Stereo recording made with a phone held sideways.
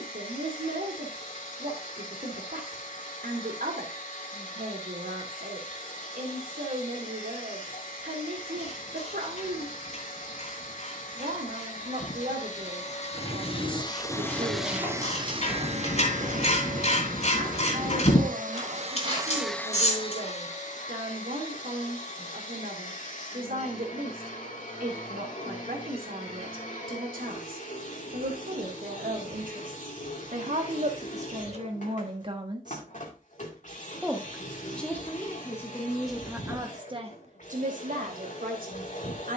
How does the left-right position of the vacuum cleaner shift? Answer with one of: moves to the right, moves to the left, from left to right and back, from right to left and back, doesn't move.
from left to right and back.